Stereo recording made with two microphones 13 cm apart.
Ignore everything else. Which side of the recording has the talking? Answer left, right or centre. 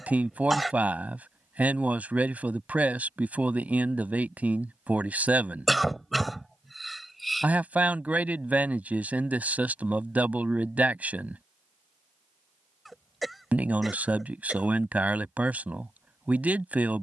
centre.